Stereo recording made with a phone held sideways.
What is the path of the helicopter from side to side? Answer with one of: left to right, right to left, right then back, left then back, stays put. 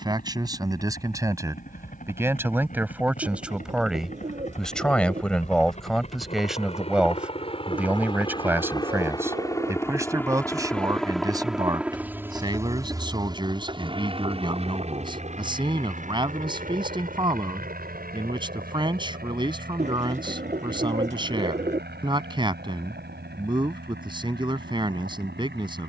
left to right.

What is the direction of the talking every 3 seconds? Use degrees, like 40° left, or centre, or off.
20° right, centre, 10° right, 20° right, 30° right, 30° right, 30° right, 30° right, 30° right.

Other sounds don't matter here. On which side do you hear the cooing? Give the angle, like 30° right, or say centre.
50° right.